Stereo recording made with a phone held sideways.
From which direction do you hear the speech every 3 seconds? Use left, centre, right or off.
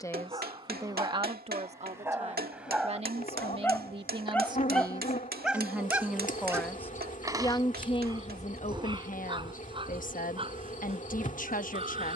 right, right, left, left.